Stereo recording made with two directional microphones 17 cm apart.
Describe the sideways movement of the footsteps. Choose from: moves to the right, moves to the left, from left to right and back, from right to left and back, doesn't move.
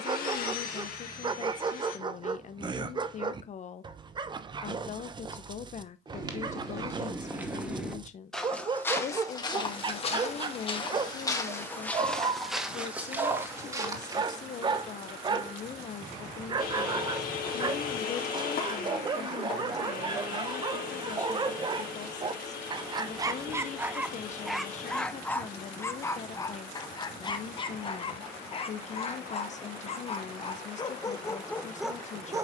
from right to left and back.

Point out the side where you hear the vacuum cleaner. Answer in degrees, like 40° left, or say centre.
60° left.